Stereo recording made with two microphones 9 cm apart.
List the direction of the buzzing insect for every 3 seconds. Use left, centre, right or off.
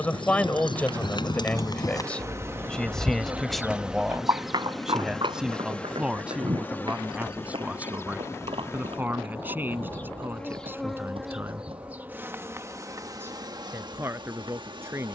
right, centre, left, centre, right.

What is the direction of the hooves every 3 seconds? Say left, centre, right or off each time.
left, right, right, right, off.